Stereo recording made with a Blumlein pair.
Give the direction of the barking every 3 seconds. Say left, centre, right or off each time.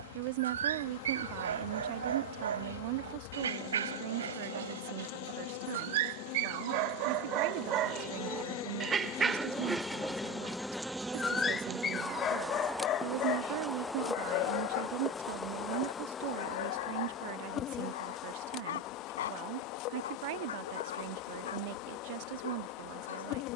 right, right, right, centre, left, left, left, left.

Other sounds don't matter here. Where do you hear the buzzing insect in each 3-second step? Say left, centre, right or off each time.
left, left, left, centre, centre, left, left, left.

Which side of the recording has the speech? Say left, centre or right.
right.